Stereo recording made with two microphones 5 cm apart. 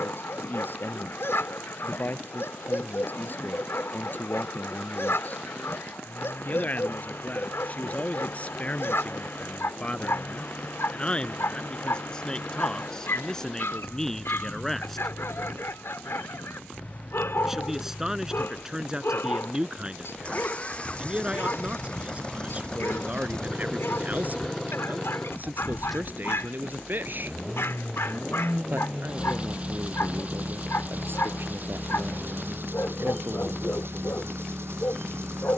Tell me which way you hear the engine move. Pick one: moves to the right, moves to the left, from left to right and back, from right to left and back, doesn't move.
moves to the right.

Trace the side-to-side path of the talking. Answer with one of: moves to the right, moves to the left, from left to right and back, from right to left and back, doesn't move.
moves to the right.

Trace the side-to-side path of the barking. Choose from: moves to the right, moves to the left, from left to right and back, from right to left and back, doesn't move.
doesn't move.